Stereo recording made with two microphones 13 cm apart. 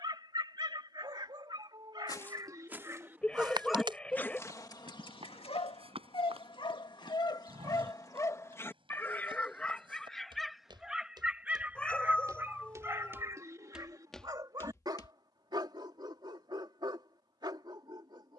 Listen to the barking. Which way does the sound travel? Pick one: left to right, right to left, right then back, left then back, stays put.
left then back.